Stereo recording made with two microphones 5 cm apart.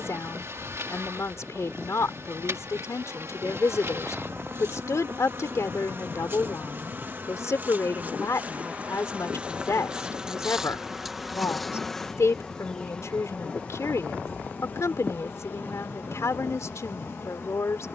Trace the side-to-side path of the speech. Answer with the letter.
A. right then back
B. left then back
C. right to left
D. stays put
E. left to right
D.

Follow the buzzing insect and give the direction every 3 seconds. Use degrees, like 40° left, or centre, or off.
60° right, 50° right, 40° right, 10° right, 20° left, 50° left.